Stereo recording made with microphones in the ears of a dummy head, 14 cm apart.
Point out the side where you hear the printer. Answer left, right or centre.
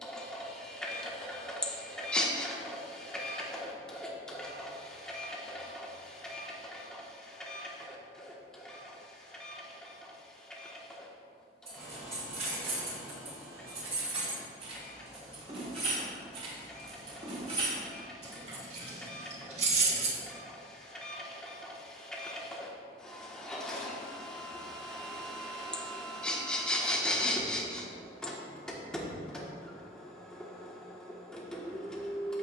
centre.